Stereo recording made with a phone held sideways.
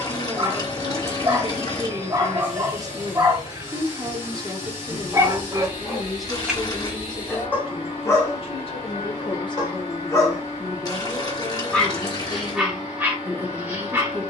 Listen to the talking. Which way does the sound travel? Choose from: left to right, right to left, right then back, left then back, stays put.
left then back.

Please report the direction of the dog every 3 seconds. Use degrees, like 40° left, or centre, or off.
20° right, 20° right, 10° left, 20° left, 10° right.